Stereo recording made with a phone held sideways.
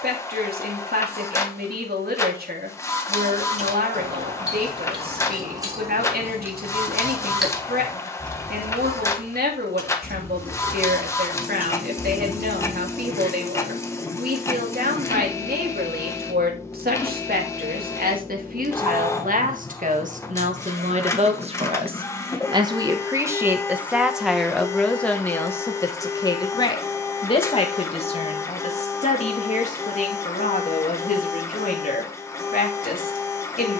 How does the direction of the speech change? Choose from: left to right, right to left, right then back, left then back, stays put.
right to left.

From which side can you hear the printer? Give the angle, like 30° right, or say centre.
20° left.